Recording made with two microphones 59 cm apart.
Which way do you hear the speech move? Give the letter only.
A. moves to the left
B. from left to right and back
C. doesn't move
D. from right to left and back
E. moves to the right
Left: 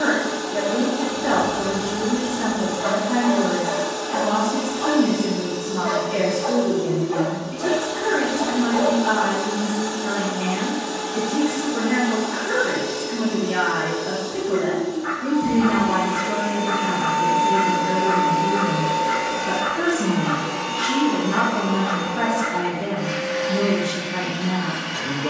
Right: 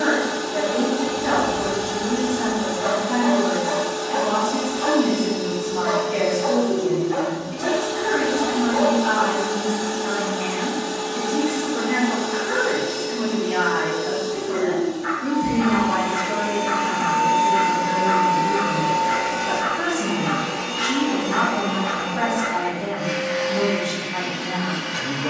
C.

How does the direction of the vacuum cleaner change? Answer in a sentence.
You can hear the vacuum cleaner stay in one place.